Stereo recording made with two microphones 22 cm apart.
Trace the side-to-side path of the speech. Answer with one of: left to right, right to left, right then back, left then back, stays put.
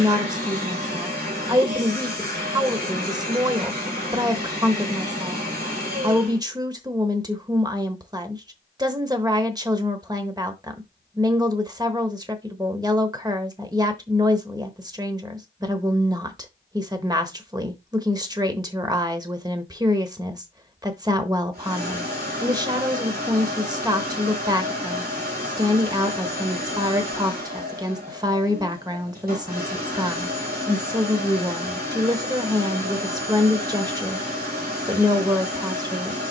stays put.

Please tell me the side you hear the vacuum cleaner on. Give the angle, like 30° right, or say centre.
40° right.